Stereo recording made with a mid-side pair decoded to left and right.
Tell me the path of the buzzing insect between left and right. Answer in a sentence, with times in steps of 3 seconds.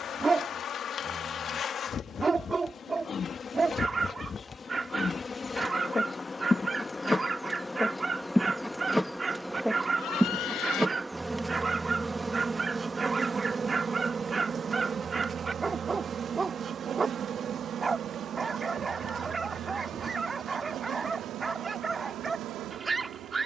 In this clip you hear the buzzing insect on the left from 0 s, in the centre from 6 s and on the right from 12 s.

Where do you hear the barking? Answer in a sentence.
In this clip you hear the barking on the right.